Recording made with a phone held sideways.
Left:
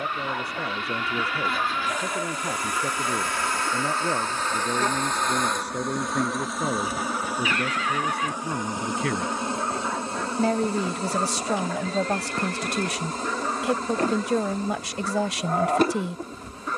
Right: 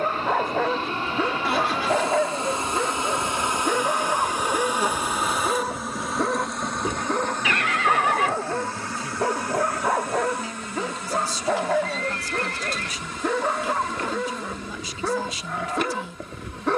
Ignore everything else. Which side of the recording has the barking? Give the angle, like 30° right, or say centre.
80° right.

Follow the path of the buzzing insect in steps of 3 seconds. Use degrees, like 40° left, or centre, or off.
30° right, 10° right, 10° left, 30° left, 40° left, 40° left.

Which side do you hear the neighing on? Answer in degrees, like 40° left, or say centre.
70° right.